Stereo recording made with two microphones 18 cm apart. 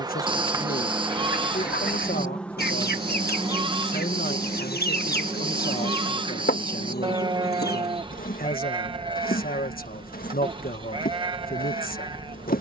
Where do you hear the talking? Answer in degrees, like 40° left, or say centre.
60° left.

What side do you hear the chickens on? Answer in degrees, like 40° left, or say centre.
70° left.